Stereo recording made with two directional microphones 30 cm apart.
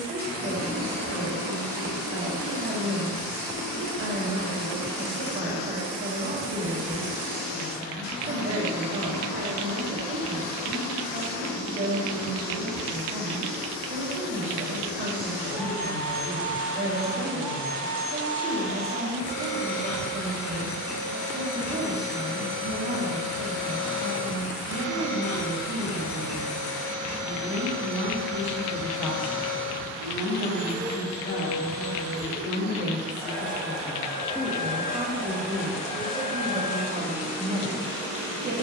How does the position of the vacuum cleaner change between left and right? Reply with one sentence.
In this clip you hear the vacuum cleaner stay in one place.